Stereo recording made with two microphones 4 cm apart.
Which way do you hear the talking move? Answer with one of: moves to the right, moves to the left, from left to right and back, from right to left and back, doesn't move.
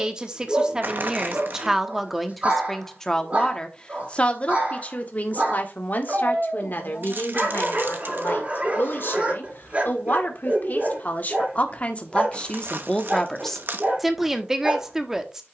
from right to left and back.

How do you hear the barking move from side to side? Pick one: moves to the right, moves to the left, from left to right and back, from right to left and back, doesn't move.
doesn't move.